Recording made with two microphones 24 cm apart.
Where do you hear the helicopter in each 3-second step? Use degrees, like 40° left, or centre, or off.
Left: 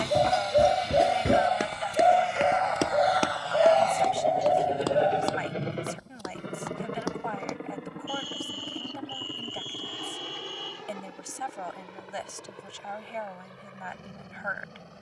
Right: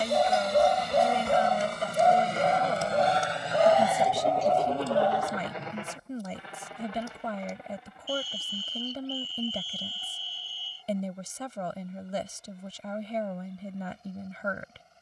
50° right, 10° left, 60° left, 70° left, 80° left.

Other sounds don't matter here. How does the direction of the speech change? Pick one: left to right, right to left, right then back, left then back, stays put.
stays put.